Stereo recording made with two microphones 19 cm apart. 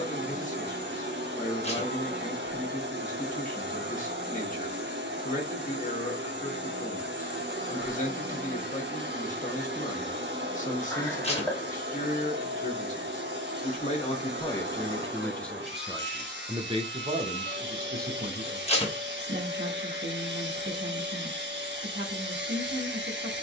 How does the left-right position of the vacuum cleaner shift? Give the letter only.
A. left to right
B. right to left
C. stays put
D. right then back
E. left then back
C.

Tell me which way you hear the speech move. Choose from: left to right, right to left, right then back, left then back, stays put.
left to right.